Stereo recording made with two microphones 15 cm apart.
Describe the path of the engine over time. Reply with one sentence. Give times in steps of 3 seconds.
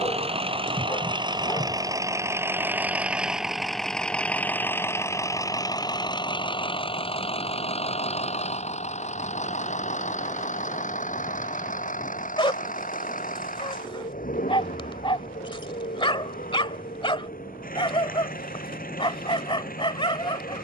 In this clip you hear the engine on the right from 0 s, in the centre from 3 s and on the left from 6 s.